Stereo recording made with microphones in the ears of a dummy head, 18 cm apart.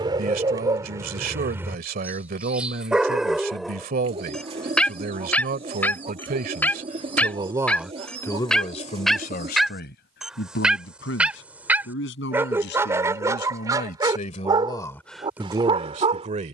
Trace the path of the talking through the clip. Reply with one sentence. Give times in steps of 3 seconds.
In this clip you hear the talking on the right from 0 s, in the centre from 6 s, on the left from 9 s and on the right from 15 s.